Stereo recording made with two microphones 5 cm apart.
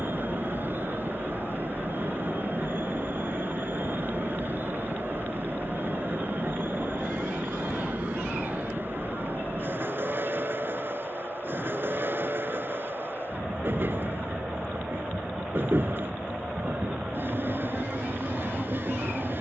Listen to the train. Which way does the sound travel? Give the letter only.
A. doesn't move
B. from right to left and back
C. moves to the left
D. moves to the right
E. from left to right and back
A.